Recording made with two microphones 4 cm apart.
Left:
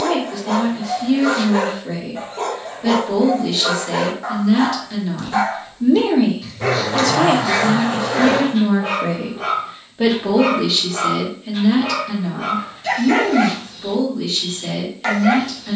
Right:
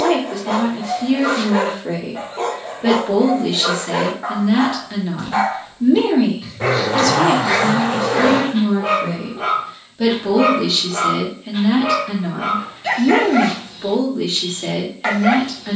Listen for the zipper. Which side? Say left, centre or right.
right.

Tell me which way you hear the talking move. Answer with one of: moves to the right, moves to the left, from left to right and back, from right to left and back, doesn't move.
from right to left and back.